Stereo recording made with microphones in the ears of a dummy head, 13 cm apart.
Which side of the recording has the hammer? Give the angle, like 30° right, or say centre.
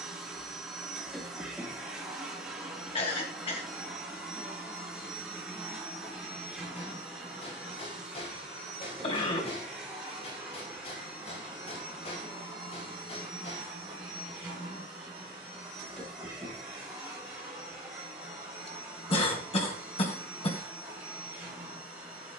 40° left.